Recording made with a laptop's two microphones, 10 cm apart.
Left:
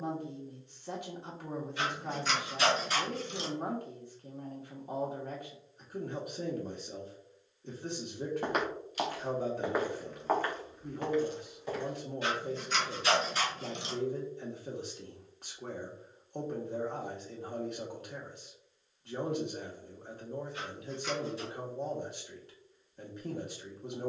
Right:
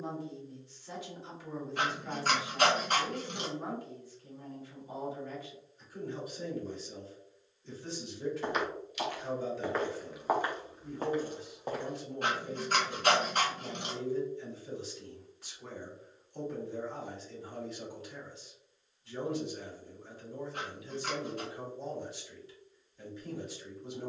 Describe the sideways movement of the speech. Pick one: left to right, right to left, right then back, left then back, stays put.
stays put.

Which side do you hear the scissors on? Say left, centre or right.
right.